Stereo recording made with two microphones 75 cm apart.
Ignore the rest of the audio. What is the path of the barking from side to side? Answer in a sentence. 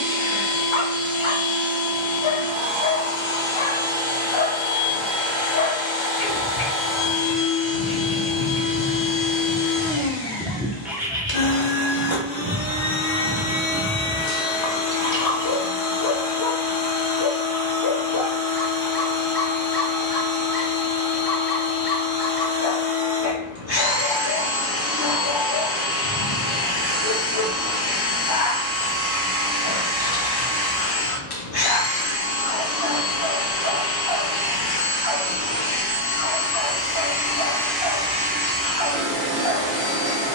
In this clip you hear the barking go right and come back.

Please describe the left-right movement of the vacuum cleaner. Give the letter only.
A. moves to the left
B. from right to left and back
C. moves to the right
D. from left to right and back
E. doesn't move
C.